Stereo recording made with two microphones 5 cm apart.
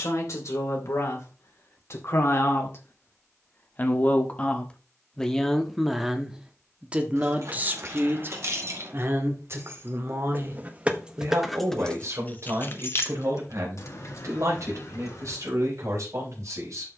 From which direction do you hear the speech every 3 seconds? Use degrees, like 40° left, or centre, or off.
60° left, 20° left, 30° right, 60° right, 70° right, 70° right.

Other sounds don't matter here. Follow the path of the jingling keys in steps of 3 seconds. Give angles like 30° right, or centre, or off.
off, off, 60° right, 20° right, 60° left, 80° left.